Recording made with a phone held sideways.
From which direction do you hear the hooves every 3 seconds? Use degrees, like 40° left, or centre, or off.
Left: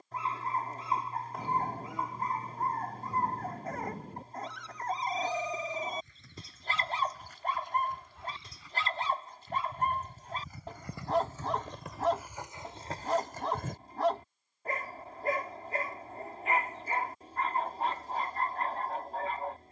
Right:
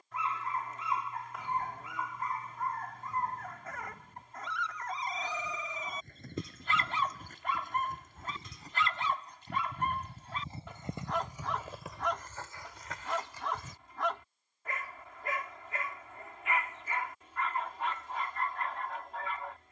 off, 50° right, 50° right, 30° right, 30° left, off, off.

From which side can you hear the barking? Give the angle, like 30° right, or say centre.
40° left.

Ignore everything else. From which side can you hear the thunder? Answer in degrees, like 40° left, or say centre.
70° left.